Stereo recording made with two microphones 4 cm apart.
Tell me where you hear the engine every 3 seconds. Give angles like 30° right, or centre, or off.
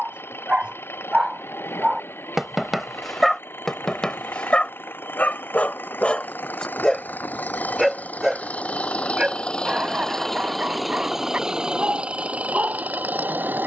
70° left, 60° left, 40° left, centre, 40° right.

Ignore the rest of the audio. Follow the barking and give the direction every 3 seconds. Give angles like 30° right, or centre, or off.
20° right, 20° left, centre, 30° right, 40° right.